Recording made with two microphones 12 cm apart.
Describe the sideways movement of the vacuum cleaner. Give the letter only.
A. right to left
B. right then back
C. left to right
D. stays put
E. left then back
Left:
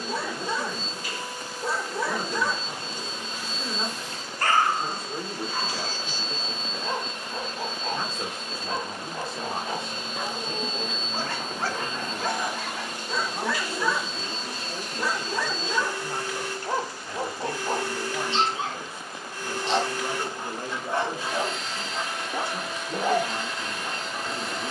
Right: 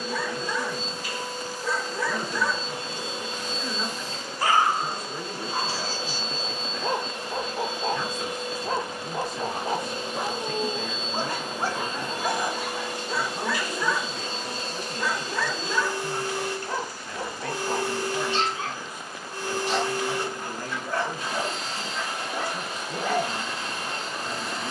D.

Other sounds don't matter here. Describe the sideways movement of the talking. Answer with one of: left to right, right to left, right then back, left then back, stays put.
stays put.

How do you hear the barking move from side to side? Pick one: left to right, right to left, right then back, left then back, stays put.
right then back.